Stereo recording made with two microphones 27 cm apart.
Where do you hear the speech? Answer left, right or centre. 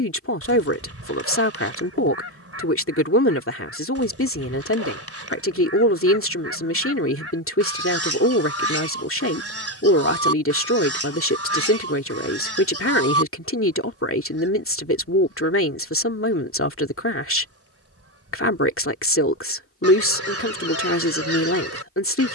left.